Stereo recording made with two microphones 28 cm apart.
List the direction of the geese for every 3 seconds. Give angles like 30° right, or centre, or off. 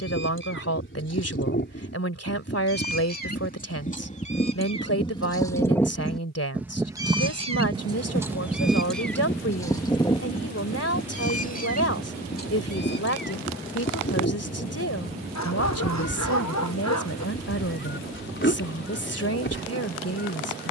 40° left, 20° left, 10° right, 20° left, 40° left, 40° left, 40° left.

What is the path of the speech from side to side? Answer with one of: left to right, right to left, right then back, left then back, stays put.
stays put.